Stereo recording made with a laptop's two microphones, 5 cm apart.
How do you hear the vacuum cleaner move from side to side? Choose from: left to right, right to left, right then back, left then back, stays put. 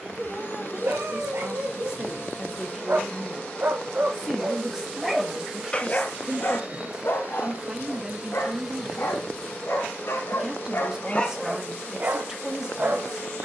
right then back.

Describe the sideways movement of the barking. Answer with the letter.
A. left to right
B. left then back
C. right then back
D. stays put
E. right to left
B.